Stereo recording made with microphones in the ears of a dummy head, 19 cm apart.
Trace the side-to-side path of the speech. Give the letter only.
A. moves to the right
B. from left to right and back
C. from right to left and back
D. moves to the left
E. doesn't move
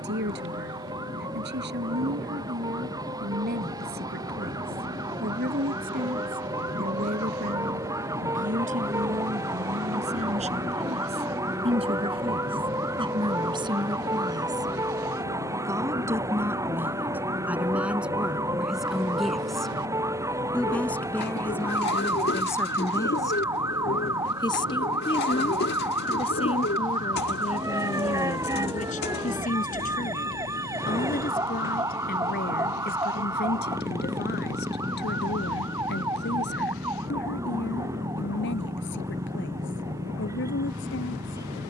D.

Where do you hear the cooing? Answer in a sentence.
You can hear the cooing on the left.